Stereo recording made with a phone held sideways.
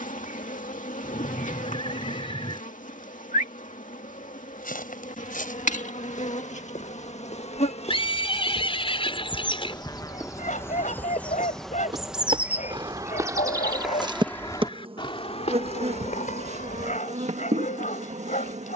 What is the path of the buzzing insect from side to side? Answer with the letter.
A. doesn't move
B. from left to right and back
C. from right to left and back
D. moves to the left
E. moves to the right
E.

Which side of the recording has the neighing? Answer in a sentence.
In this clip you hear the neighing on the left.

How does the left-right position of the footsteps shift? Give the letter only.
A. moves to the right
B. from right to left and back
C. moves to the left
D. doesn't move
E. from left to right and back
E.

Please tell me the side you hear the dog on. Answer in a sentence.
In this clip you hear the dog on the left.